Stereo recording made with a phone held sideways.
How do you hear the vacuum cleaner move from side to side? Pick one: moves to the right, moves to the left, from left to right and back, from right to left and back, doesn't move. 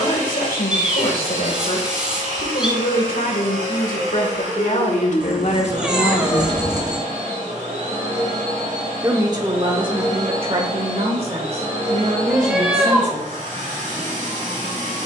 doesn't move.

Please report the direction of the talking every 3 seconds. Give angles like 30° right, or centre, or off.
80° left, 70° left, 40° left, 40° right, 50° right.